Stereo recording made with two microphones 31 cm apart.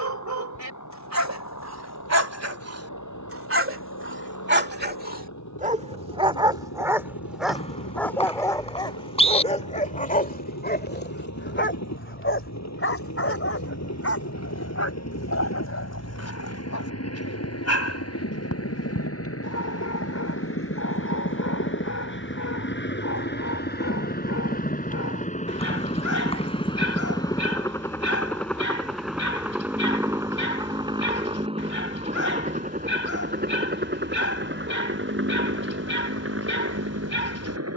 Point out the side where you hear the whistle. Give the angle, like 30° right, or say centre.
20° left.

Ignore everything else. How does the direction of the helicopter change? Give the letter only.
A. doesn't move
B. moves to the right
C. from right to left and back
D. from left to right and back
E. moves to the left
B.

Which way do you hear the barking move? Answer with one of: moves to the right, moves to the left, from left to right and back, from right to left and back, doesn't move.
moves to the left.